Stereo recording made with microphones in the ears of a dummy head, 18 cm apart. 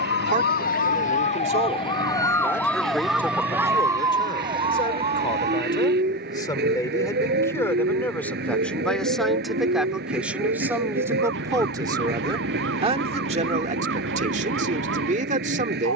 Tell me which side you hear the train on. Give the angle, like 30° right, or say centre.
50° right.